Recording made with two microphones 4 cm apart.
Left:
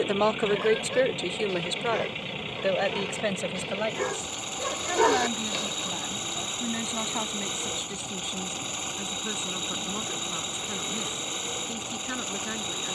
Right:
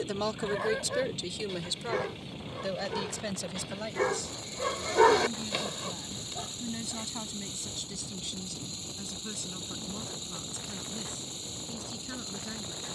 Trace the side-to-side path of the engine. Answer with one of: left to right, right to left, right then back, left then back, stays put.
stays put.